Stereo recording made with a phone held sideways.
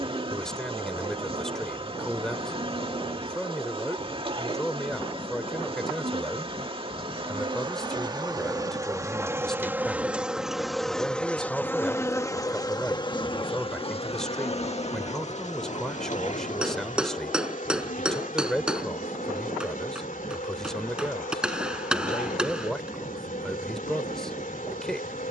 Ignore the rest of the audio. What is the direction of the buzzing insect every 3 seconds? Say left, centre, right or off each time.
right, right, right, centre, left, left, left, left, left.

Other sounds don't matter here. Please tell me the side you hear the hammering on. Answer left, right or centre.
centre.